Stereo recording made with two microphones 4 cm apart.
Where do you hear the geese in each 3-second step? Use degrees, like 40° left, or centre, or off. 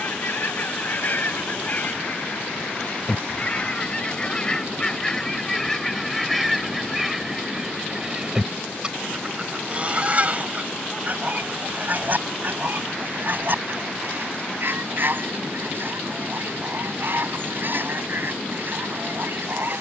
40° left, 20° left, 10° right, 30° right, 50° right, 50° right, 50° right.